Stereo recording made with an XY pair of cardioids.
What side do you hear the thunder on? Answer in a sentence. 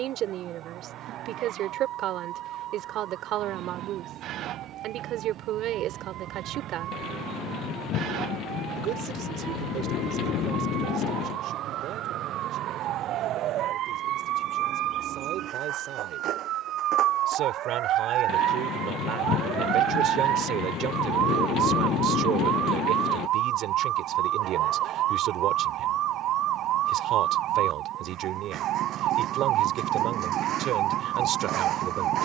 You can hear the thunder on the left.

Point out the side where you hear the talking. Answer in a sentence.
You can hear the talking on the right.